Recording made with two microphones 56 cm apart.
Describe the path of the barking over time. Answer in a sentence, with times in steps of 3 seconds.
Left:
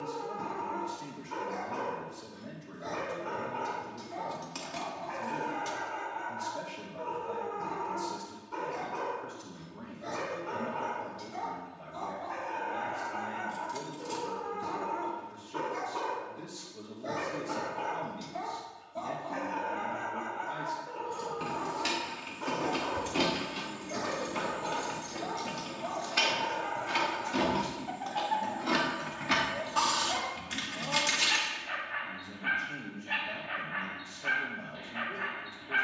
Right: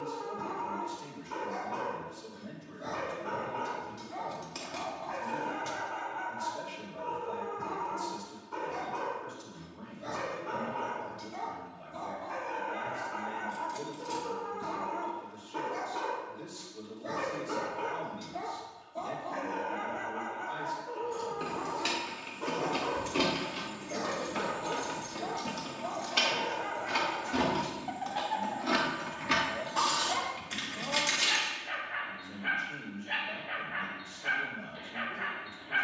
In this clip you hear the barking on the right from 0 s, in the centre from 15 s and on the left from 18 s.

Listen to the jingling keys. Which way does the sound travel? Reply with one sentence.
You can hear the jingling keys go right and come back.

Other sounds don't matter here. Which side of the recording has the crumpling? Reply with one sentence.
You can hear the crumpling on the left.